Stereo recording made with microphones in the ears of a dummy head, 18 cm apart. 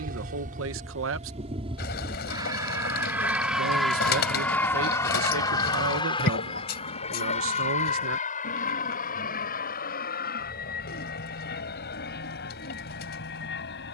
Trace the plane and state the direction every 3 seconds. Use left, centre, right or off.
right, centre, left, left, left.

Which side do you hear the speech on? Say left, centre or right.
right.